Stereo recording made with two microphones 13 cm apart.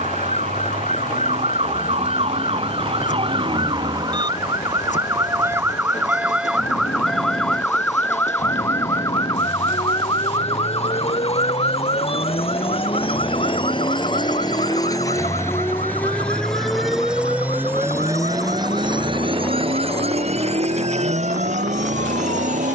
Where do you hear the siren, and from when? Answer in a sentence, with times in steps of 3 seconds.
You can hear the siren on the right from 0 s, in the centre from 6 s and on the left from 9 s.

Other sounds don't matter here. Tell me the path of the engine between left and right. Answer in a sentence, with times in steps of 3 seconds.
In this clip you hear the engine on the left from 0 s, in the centre from 15 s and on the right from 18 s.